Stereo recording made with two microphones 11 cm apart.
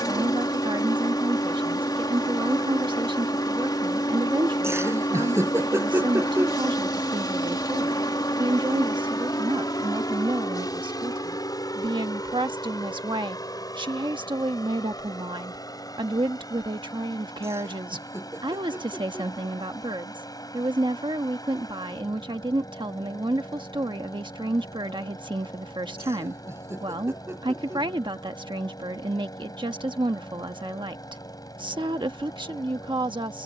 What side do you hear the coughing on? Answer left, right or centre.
right.